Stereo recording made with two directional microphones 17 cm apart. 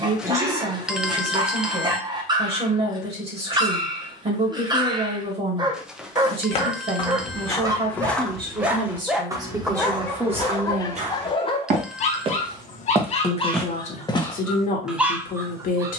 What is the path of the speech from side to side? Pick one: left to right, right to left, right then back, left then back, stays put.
right to left.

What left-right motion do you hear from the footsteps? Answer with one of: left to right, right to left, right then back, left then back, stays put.
right then back.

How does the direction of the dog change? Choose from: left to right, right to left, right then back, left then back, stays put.
left then back.